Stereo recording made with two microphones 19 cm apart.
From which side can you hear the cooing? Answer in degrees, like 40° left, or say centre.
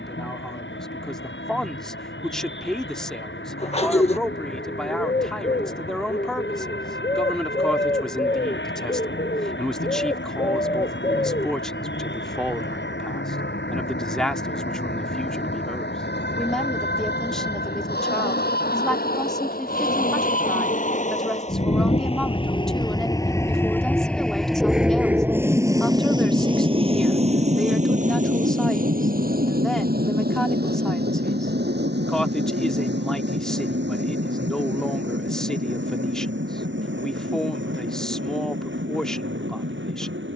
30° left.